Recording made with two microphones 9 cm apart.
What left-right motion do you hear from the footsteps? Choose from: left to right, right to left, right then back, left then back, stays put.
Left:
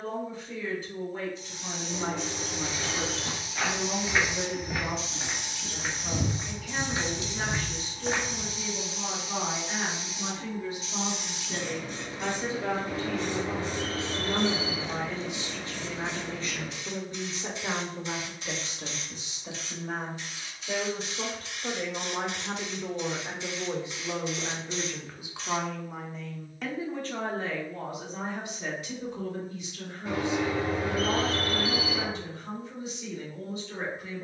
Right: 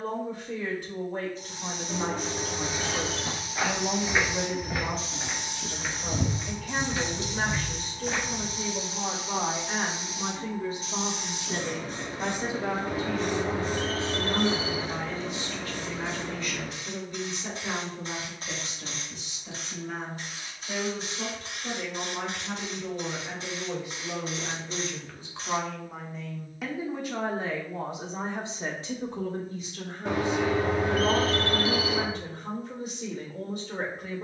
right to left.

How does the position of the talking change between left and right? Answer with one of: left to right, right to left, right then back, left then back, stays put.
left then back.